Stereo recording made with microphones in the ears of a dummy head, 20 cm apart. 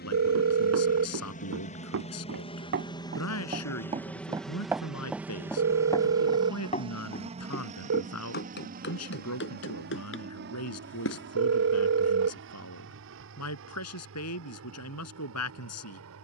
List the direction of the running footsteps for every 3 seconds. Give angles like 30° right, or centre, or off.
60° right, 10° right, 40° left, 60° left, off, off.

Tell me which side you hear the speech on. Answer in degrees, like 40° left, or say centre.
80° left.